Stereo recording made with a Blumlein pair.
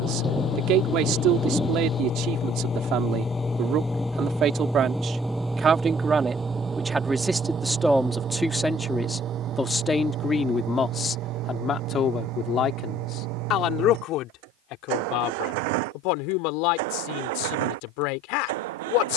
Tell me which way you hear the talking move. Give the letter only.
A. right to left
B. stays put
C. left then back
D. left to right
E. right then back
A.